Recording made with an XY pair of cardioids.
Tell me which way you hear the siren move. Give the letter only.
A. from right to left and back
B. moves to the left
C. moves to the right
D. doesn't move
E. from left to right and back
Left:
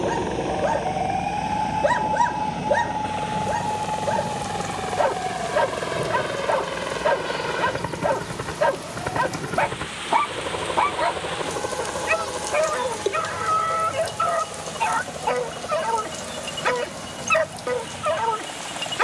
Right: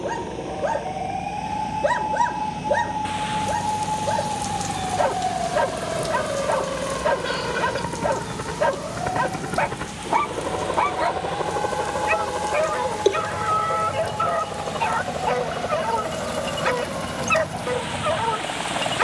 C.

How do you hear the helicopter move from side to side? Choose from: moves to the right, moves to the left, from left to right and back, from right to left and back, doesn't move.
moves to the right.